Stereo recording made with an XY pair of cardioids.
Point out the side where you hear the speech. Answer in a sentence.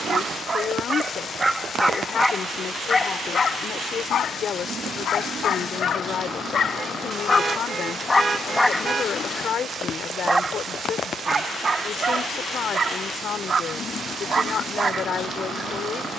In this clip you hear the speech on the left.